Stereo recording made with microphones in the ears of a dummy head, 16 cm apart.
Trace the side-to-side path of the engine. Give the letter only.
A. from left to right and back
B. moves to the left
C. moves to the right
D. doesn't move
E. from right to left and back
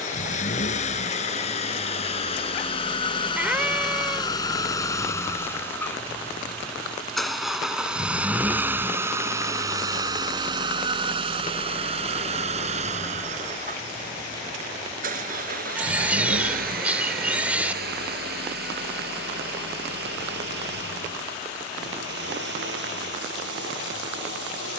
C.